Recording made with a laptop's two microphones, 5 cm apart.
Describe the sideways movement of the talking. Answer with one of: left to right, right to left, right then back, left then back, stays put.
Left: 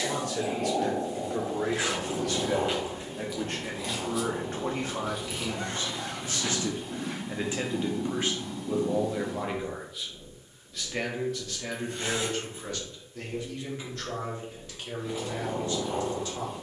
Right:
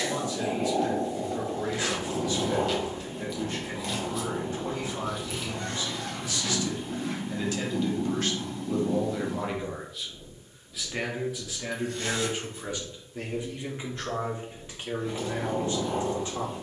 left to right.